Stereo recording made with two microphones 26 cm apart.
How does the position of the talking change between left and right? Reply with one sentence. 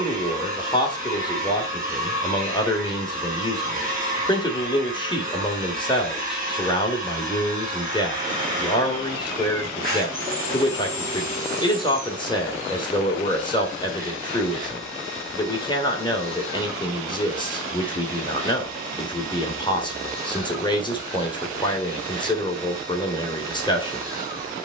In this clip you hear the talking stay put.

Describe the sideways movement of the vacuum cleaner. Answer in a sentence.
You can hear the vacuum cleaner stay put.